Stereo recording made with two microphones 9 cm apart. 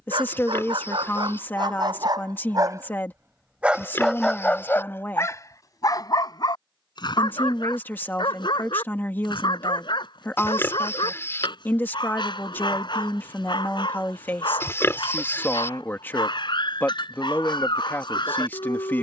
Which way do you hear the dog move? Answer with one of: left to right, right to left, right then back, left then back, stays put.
right to left.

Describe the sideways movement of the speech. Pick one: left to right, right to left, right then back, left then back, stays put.
stays put.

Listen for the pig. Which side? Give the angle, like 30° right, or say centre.
30° left.